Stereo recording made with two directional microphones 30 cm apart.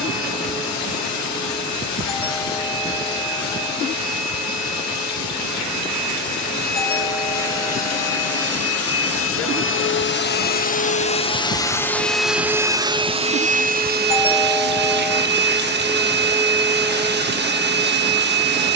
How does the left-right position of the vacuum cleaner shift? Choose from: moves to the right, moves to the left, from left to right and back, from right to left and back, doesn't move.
moves to the right.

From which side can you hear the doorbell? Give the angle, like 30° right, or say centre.
30° left.